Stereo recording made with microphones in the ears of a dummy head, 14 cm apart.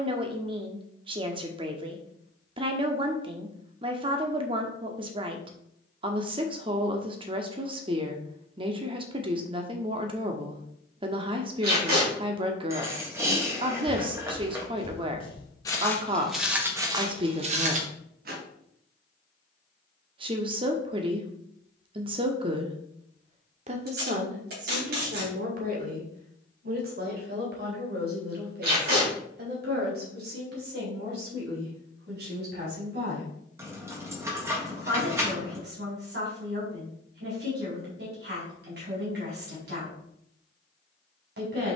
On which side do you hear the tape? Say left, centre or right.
right.